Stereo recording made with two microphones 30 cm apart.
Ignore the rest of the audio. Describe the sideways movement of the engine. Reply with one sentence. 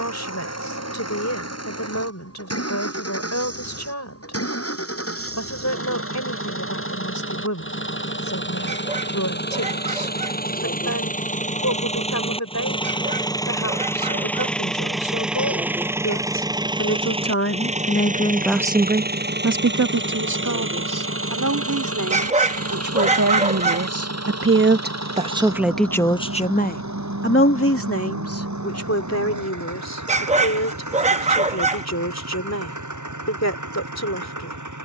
You can hear the engine move from left to right.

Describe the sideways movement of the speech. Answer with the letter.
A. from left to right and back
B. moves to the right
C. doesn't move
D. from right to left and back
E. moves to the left
A.